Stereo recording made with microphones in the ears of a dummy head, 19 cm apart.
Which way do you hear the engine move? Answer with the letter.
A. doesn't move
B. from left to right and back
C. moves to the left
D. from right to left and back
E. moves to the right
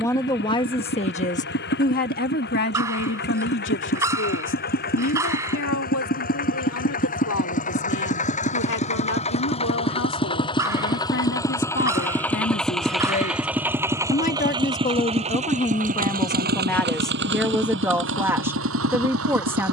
E.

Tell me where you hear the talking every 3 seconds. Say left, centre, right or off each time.
left, left, left, left, left, centre, centre.